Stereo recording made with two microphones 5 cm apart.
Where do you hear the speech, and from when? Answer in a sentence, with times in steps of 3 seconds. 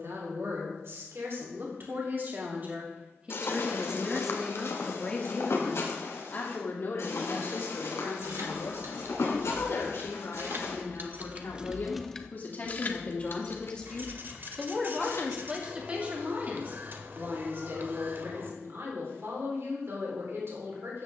In this clip you hear the speech on the right from 0 s, in the centre from 3 s, on the left from 6 s and on the right from 15 s.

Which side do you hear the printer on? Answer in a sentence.
In this clip you hear the printer on the right.